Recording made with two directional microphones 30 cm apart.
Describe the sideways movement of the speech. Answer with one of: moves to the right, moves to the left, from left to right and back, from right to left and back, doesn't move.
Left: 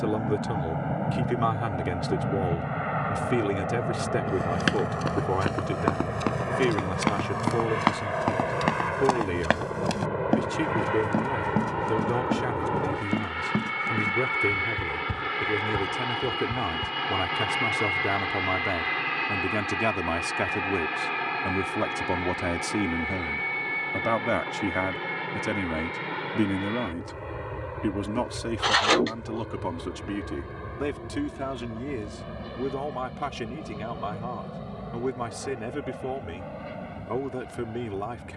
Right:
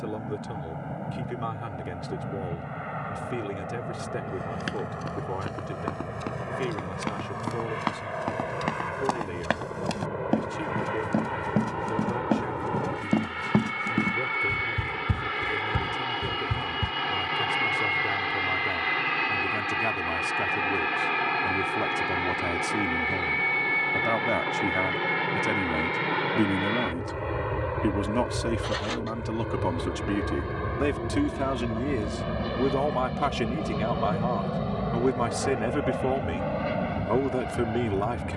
moves to the right.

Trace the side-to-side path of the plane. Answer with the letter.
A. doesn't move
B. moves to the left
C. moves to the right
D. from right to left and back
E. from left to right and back
C.